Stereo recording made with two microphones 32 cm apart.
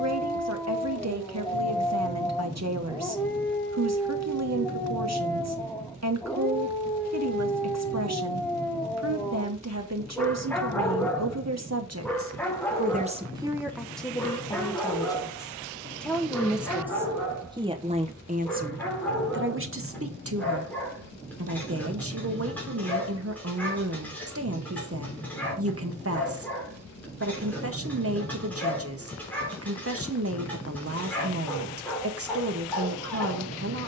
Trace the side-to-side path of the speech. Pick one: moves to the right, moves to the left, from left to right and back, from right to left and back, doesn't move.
from right to left and back.